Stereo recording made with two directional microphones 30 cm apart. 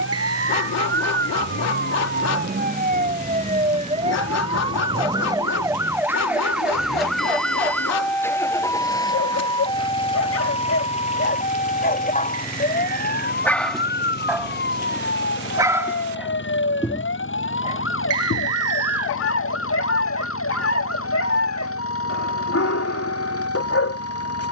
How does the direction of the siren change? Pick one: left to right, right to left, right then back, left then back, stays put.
right to left.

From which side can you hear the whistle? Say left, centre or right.
right.